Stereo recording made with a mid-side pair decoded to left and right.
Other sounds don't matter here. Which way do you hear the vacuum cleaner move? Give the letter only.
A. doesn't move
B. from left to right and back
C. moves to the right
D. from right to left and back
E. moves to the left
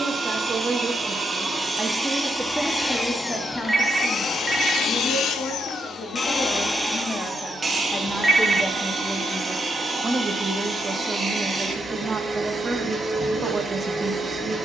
D.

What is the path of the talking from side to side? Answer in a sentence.
In this clip you hear the talking move from right to left and back again.